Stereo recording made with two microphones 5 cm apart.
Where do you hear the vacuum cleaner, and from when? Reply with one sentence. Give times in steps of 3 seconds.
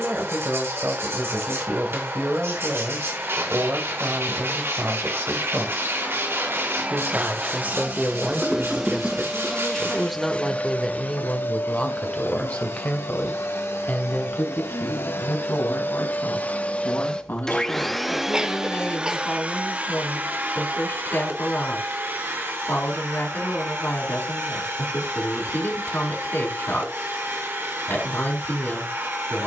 In this clip you hear the vacuum cleaner on the right from 0 s, on the left from 9 s and on the right from 18 s.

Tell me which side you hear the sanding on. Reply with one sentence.
You can hear the sanding on the right.